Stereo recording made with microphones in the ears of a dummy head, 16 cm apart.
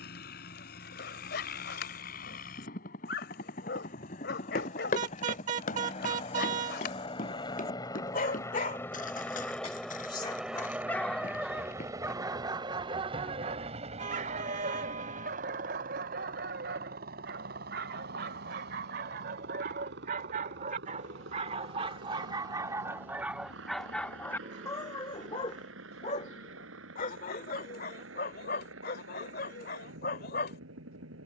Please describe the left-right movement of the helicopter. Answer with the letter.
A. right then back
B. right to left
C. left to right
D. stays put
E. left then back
C.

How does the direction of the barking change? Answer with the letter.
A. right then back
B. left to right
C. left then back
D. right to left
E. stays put
A.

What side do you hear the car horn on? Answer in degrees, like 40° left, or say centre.
40° right.